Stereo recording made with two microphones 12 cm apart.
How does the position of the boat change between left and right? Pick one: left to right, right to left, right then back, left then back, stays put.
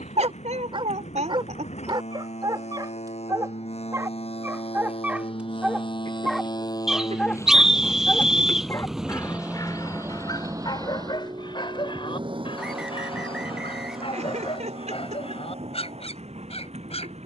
left to right.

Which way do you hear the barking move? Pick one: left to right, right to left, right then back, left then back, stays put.
right to left.